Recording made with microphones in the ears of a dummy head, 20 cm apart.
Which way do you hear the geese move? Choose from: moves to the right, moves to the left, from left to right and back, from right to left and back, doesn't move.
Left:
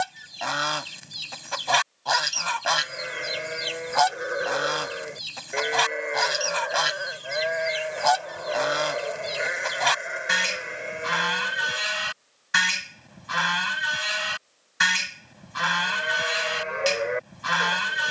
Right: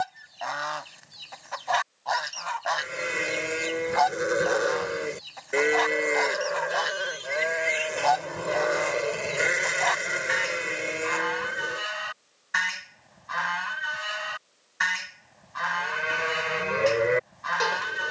doesn't move.